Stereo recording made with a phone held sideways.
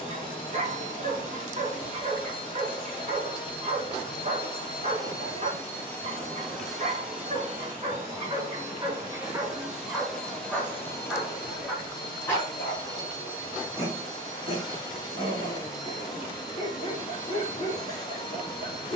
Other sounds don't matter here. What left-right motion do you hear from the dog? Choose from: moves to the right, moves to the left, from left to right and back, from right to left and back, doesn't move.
moves to the left.